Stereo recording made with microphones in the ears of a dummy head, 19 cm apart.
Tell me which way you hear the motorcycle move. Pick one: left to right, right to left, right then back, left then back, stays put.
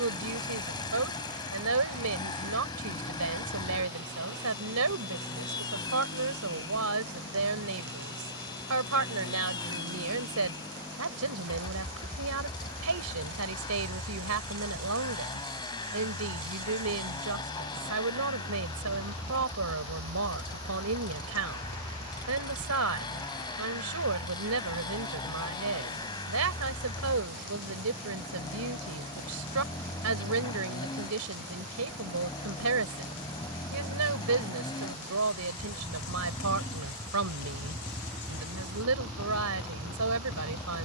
stays put.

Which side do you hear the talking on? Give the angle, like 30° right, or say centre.
80° right.